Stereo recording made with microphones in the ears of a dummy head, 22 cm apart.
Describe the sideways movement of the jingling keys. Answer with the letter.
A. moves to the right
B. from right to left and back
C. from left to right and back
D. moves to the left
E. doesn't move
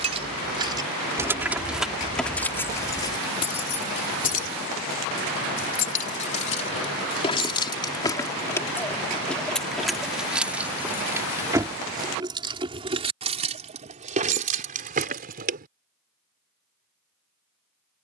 B.